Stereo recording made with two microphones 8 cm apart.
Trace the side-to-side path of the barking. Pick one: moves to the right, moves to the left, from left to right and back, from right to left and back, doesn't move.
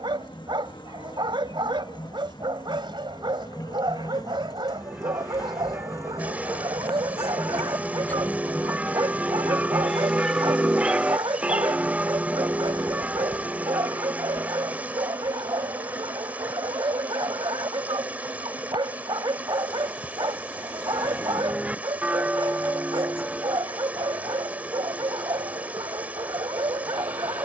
doesn't move.